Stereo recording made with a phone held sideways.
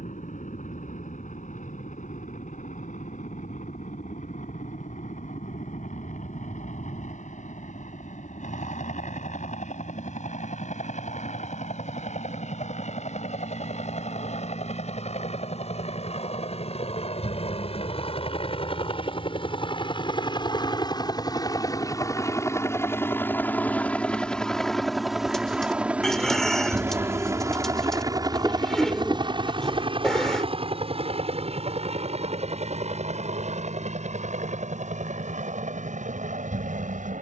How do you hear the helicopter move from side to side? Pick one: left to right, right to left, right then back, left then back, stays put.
left to right.